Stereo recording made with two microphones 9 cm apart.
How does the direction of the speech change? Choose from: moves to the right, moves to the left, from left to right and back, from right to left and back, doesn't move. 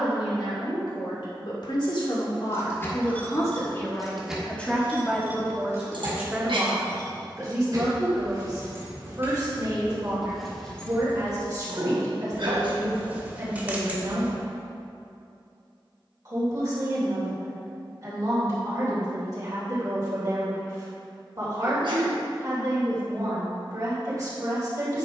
moves to the right.